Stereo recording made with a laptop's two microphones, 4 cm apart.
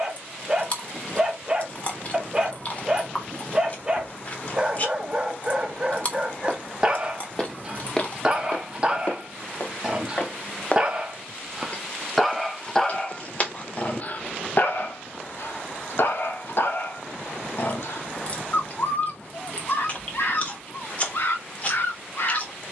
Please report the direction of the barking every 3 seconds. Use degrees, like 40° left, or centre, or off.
20° right, 20° right, 20° right, 20° right, 30° left, 60° left, 60° left, 60° left.